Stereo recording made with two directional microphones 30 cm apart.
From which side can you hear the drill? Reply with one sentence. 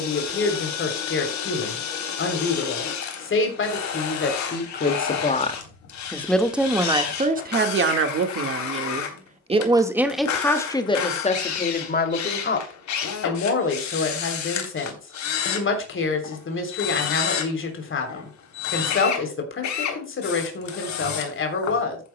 In this clip you hear the drill on the left.